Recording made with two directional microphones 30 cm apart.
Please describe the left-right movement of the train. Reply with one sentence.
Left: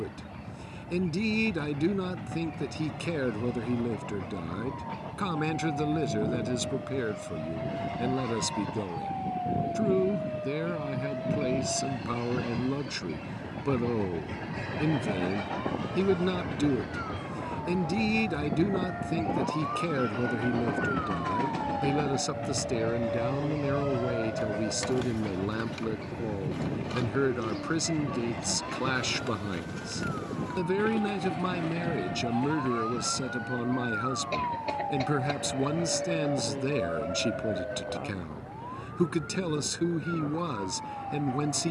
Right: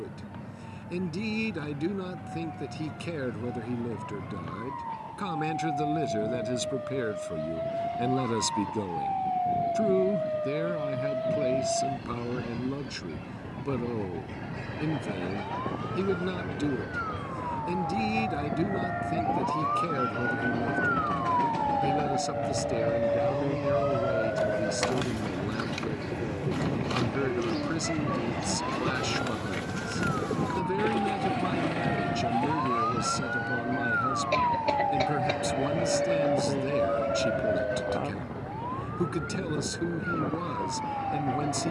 In this clip you hear the train go from the left side to the right.